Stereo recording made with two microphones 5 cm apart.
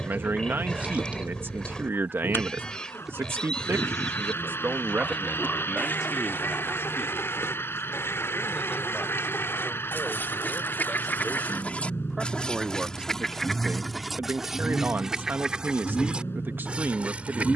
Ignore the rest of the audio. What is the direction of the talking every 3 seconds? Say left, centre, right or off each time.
right, right, centre, centre, right, right.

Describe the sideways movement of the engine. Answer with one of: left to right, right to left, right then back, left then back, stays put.
stays put.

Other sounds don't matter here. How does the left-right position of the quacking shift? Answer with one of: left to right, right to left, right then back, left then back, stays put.
left then back.